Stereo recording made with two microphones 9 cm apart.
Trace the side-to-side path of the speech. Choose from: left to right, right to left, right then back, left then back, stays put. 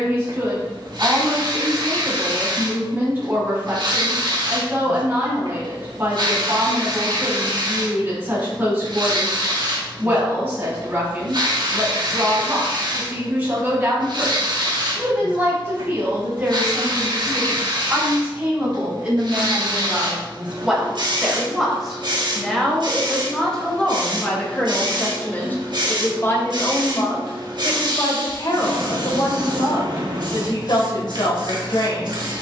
right to left.